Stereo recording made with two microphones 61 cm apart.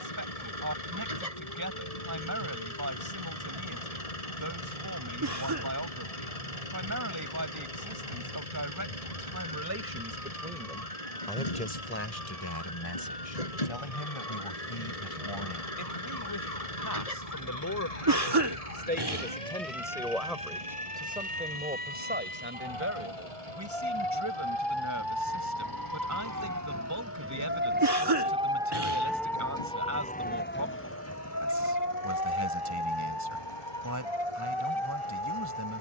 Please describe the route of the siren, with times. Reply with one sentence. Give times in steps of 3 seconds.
You can hear the siren on the right from 0 s, in the centre from 27 s and on the left from 30 s.